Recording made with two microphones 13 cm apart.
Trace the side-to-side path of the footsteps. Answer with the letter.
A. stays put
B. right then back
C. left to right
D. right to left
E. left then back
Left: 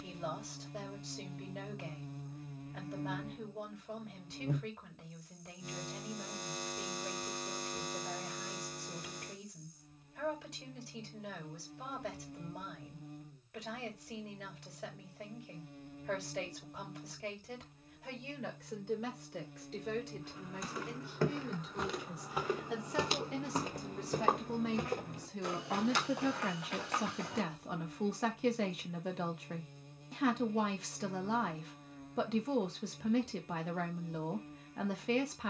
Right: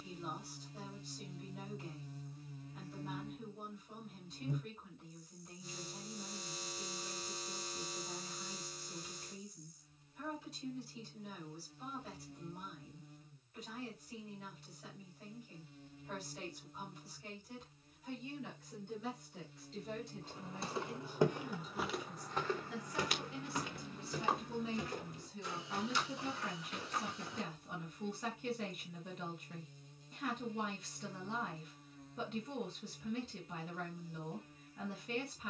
D.